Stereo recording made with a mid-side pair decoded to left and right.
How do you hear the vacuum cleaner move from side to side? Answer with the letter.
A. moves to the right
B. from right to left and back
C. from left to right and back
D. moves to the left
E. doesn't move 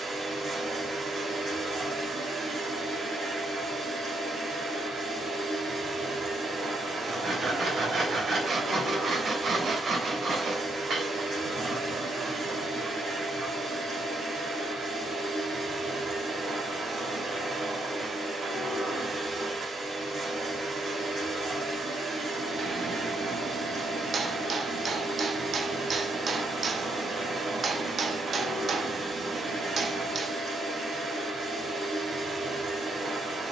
E.